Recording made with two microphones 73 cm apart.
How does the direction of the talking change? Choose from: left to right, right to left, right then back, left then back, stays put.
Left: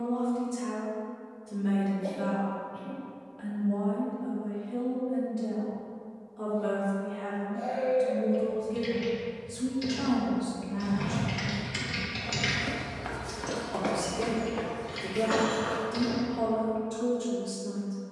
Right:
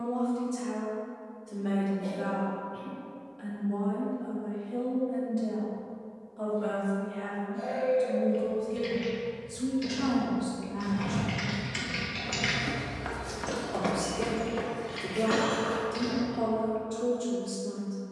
right then back.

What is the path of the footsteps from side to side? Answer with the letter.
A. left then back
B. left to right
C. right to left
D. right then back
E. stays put
B.